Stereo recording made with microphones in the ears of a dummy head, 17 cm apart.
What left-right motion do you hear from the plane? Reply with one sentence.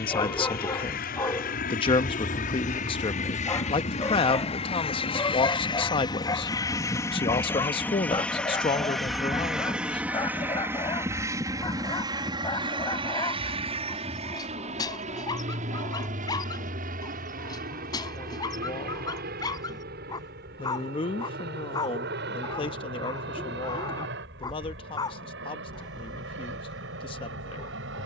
You can hear the plane move to the right.